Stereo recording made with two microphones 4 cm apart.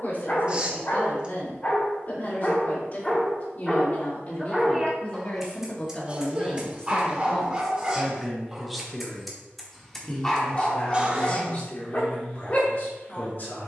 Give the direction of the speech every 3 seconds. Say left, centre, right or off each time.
left, left, centre, left, left.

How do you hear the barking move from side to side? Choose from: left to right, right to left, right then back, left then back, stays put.
right then back.